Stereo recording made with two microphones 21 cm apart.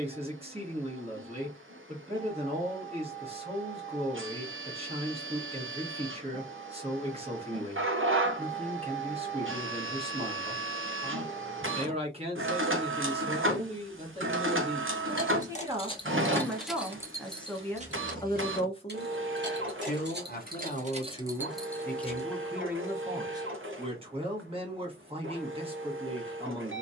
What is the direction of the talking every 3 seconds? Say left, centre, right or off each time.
right, right, right, right, right, centre, left, centre, right.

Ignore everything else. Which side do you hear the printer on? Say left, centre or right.
right.